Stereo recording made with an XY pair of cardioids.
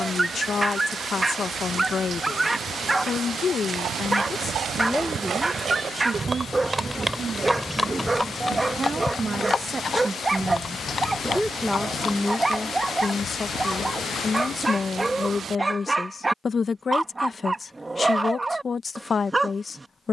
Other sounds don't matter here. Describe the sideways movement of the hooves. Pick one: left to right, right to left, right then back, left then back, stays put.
right to left.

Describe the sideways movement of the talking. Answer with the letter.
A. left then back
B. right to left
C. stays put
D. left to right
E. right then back
E.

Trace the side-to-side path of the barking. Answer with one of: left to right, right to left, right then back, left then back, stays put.
stays put.